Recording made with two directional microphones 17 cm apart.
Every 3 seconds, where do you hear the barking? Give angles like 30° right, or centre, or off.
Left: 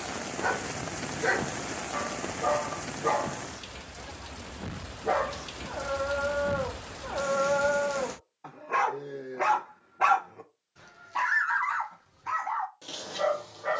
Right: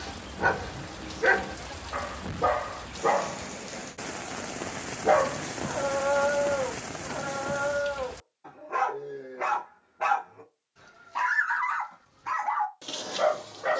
40° right, 30° right, 20° left, 20° left, 30° right.